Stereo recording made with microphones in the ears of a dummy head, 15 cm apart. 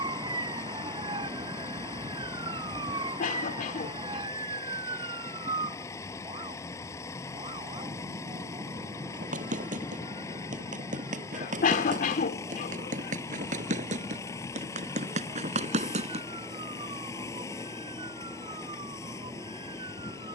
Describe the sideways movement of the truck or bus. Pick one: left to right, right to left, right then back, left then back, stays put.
stays put.